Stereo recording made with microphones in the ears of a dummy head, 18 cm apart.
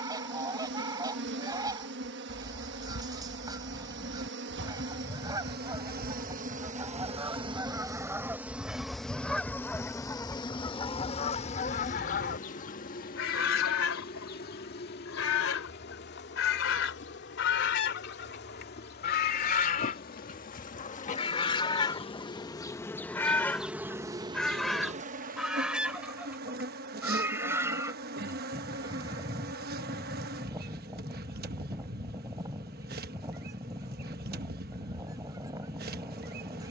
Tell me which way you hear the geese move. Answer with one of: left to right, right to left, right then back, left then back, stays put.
left then back.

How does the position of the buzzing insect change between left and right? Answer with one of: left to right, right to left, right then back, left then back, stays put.
left then back.